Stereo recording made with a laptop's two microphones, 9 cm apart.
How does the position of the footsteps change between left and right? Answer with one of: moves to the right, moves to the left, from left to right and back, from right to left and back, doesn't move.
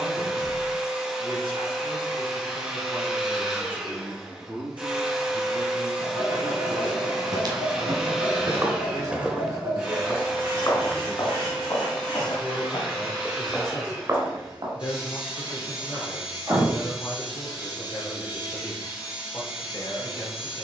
from right to left and back.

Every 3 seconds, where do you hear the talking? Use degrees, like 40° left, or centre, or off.
80° right, 70° right, 60° right, 10° right, 40° left, 50° left, 50° left.